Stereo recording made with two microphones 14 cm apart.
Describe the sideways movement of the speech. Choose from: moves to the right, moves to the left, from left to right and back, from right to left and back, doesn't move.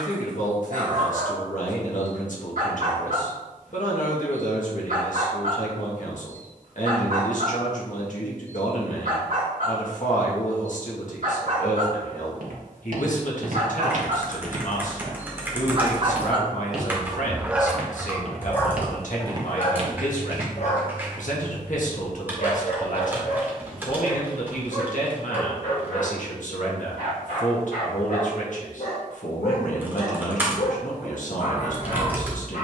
doesn't move.